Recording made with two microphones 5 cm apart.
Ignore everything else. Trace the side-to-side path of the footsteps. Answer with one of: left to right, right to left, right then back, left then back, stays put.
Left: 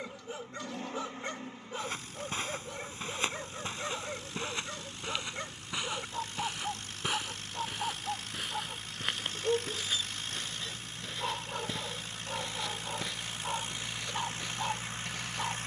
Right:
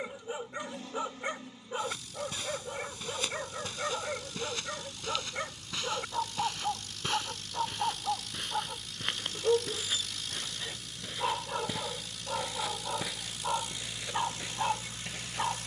left to right.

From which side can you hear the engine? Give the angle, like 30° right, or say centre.
30° left.